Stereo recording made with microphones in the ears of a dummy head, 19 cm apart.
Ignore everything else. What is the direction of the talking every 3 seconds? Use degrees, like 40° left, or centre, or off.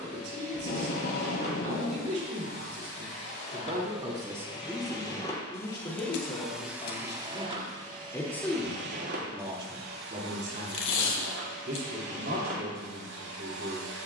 50° right, 10° right, 20° left, 30° right, 50° right.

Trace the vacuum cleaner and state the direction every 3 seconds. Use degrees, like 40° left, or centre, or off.
40° left, 30° left, 30° right, 70° right, 80° right.